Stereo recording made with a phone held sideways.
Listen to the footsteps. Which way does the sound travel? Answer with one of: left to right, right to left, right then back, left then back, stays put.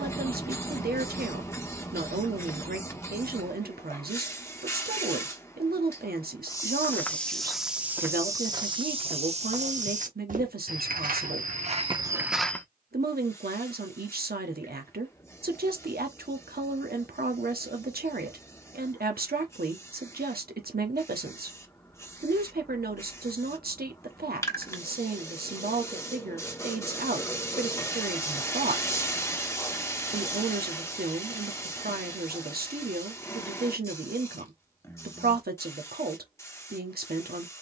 right then back.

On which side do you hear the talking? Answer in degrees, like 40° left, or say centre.
70° right.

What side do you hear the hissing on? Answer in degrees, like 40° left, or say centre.
20° left.